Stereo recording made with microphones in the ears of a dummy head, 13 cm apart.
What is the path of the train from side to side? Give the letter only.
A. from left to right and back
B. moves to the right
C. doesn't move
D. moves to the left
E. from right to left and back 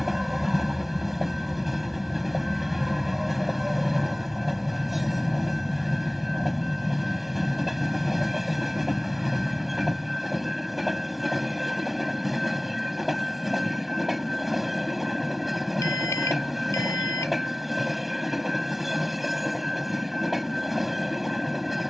C.